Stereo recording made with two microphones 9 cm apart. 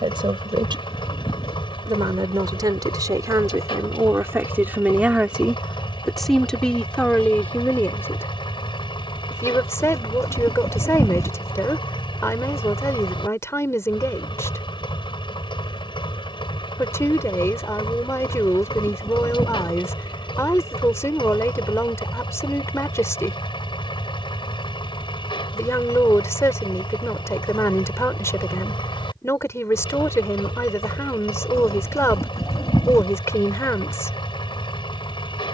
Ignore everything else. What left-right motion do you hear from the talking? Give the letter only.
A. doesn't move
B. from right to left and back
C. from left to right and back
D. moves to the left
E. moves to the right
D.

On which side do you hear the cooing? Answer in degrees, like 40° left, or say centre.
40° left.